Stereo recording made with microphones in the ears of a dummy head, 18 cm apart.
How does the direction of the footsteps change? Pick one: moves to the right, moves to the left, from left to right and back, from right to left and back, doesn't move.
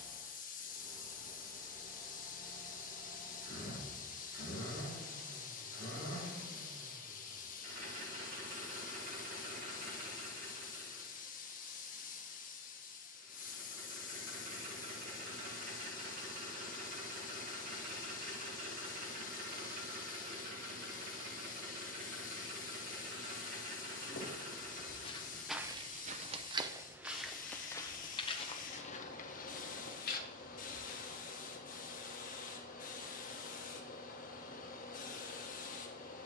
from left to right and back.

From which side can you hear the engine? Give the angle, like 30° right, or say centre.
50° right.